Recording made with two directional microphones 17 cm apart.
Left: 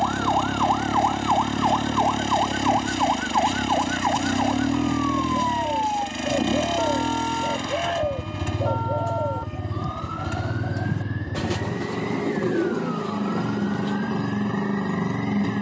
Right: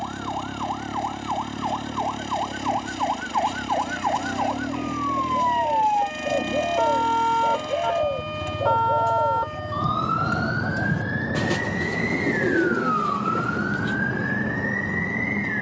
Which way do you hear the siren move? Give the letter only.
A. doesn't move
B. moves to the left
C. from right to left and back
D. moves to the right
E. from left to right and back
D.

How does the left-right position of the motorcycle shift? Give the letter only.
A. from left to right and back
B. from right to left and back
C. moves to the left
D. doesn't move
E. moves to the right
D.